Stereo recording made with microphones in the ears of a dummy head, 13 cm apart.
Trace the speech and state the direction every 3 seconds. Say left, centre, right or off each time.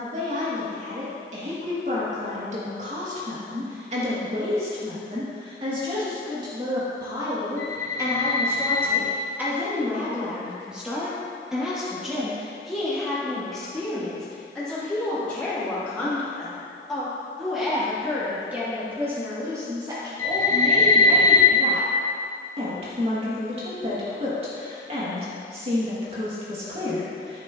right, right, right, centre, centre, centre, right, right, right.